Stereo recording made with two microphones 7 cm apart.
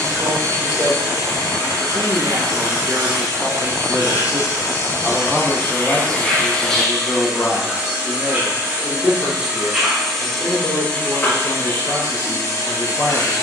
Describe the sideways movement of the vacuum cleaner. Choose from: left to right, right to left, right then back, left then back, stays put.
right then back.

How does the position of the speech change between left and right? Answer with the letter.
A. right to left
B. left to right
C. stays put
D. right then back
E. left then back
A.